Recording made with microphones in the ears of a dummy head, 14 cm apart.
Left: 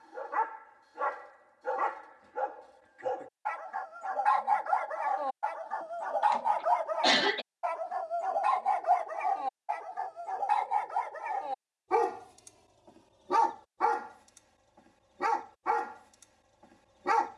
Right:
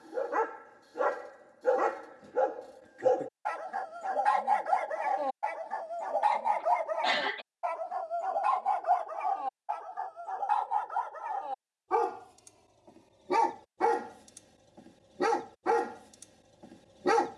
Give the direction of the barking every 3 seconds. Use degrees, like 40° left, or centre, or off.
50° right, 30° right, centre, 10° left, 20° right, 40° right.